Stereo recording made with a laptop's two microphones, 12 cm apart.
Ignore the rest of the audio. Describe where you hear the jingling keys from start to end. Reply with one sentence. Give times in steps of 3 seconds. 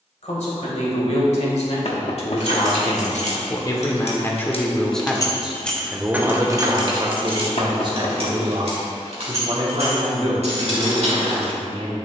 You can hear the jingling keys on the left from 0 s and on the right from 6 s.